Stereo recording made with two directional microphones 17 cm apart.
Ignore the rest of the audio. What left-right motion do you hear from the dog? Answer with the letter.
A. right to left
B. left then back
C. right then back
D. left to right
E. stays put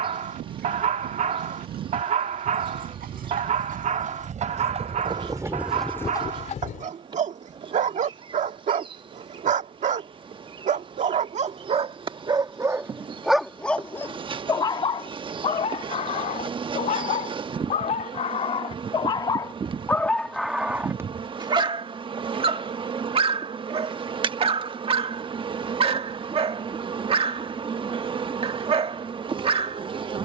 B.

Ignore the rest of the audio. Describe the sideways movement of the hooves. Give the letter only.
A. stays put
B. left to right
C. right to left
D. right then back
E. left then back
C.